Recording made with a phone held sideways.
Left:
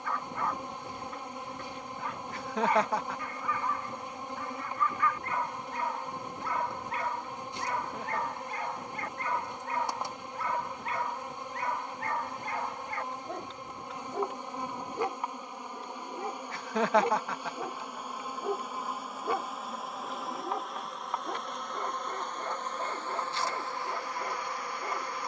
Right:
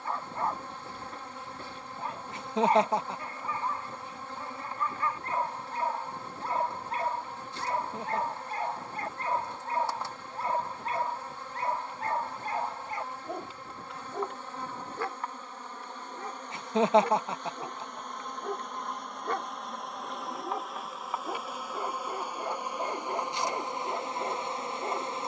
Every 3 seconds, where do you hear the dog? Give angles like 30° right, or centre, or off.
30° right, 30° right, 30° right, 30° right, 20° right, 20° left, centre, 20° right, 20° right.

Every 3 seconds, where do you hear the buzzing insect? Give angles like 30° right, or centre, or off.
20° left, 20° left, 20° left, 20° left, 20° left, 10° left, centre, 10° right, 20° right.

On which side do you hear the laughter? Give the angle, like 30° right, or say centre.
20° right.